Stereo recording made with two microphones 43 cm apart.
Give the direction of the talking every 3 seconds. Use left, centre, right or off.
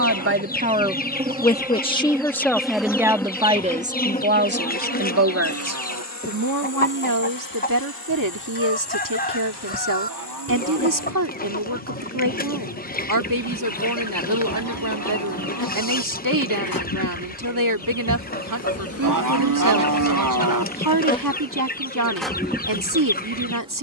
centre, right, right, right, right, right, right, right.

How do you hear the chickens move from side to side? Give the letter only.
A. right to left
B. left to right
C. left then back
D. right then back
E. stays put
E.